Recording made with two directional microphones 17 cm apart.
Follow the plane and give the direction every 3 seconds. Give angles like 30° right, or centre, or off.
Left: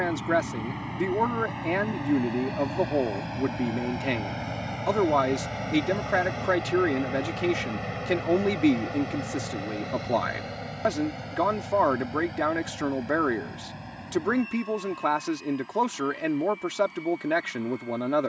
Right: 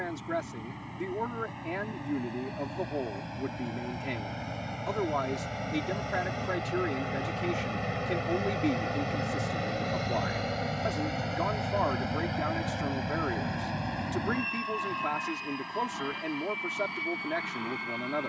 40° left, 30° left, centre, 20° right, 40° right, 50° right.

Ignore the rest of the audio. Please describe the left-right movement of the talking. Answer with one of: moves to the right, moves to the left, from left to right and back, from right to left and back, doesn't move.
doesn't move.